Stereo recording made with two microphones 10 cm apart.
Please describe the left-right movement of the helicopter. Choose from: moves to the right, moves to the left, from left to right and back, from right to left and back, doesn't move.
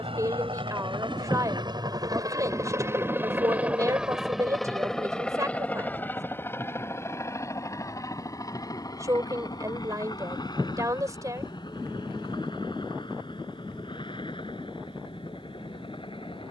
moves to the left.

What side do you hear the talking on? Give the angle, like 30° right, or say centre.
30° right.